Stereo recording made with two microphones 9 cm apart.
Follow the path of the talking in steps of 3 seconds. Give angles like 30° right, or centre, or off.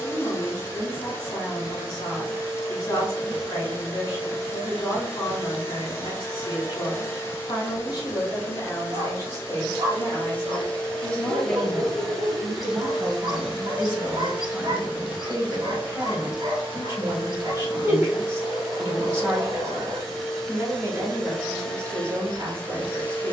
40° left, 40° left, 40° left, 20° left, 20° right, 30° right, 30° right, 30° right.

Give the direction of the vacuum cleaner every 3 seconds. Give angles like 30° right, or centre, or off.
30° left, 30° left, 30° left, 20° left, 10° right, 10° right, centre, 10° left.